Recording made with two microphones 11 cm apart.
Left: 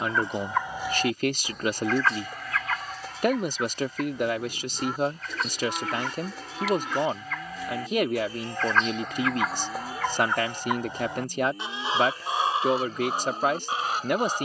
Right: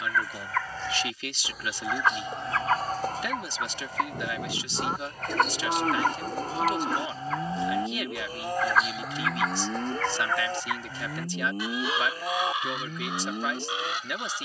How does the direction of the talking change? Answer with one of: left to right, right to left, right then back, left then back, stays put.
stays put.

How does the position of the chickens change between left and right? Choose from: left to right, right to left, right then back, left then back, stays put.
right then back.